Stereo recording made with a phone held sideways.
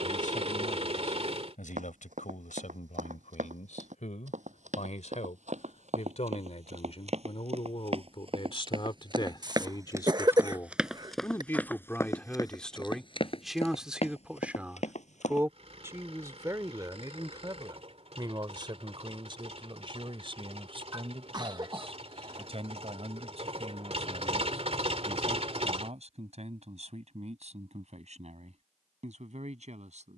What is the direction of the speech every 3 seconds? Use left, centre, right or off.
left, left, left, left, centre, right, right, right, right, right.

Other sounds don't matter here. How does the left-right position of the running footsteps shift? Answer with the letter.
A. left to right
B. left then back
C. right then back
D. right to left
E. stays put
D.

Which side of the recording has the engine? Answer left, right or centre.
right.